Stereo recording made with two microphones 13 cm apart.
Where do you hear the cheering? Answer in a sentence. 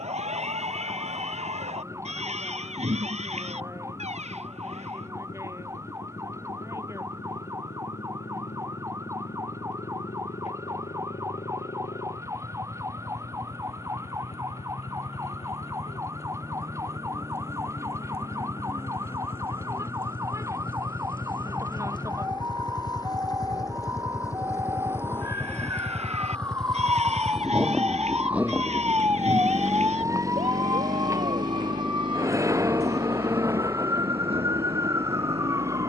In this clip you hear the cheering on the right.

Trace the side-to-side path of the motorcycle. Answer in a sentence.
In this clip you hear the motorcycle go from the left side to the right.